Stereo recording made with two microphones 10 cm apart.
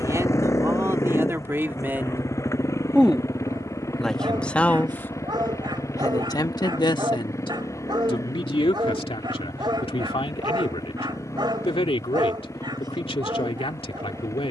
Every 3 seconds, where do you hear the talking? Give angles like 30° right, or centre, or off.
30° right, 10° left, 60° left, 80° left, 80° left.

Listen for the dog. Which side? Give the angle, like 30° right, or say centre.
50° right.